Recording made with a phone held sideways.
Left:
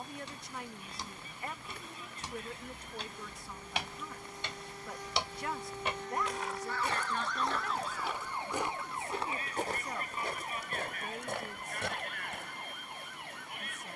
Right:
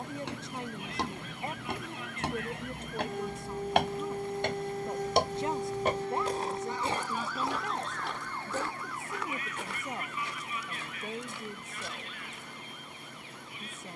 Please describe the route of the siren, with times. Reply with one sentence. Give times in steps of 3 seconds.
You can hear the siren on the right from 0 s, in the centre from 6 s and on the left from 9 s.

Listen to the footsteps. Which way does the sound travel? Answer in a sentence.
In this clip you hear the footsteps go from the right side to the left.